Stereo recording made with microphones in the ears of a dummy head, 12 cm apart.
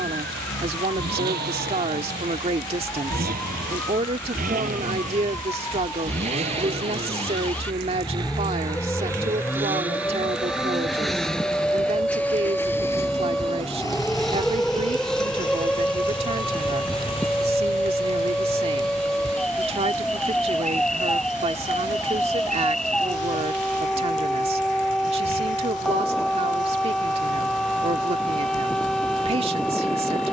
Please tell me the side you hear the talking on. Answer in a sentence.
You can hear the talking on the right.